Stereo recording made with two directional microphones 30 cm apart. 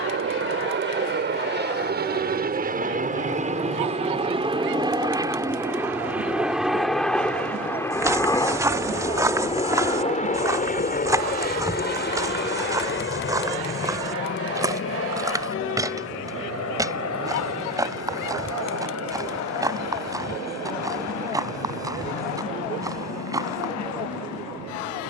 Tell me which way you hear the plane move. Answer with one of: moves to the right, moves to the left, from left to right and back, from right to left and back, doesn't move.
moves to the left.